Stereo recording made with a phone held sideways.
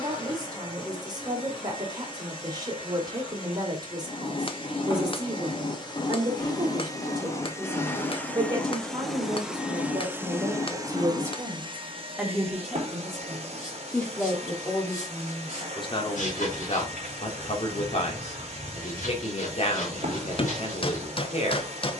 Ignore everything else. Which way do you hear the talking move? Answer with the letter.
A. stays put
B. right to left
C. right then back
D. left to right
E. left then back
B.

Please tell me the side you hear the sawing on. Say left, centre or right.
left.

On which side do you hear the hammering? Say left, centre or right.
left.